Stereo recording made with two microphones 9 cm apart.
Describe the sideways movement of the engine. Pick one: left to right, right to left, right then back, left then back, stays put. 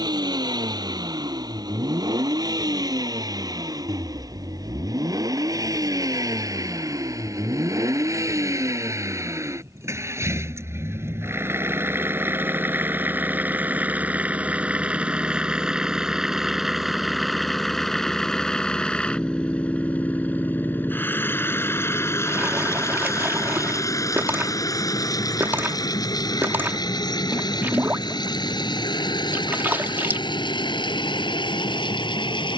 right to left.